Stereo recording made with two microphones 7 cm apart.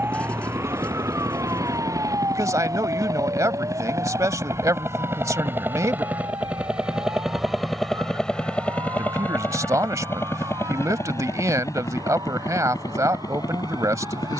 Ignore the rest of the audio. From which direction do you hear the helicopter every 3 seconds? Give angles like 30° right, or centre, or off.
60° right, 40° right, centre, 30° left, 50° left.